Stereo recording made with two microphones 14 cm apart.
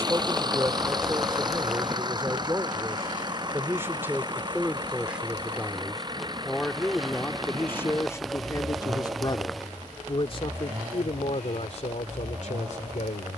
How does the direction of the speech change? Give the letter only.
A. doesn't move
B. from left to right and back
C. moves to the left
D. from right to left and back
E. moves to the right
C.